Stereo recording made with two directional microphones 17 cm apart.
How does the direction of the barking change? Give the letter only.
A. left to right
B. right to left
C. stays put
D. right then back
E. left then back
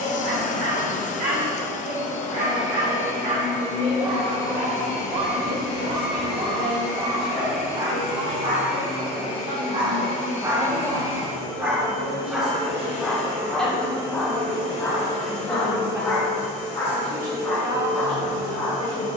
B.